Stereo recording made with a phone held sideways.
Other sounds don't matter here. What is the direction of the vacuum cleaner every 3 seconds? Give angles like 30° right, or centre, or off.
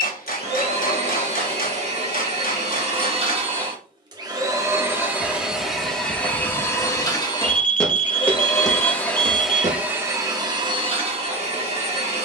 40° right, 20° right, 20° left, 20° right.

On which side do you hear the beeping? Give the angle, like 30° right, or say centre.
60° left.